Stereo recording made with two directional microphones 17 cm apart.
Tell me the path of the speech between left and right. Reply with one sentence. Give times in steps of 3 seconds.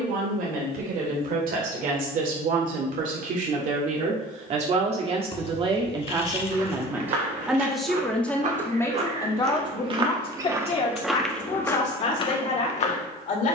You can hear the speech on the right from 0 s, in the centre from 6 s and on the left from 9 s.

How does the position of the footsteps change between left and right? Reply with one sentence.
In this clip you hear the footsteps move from right to left.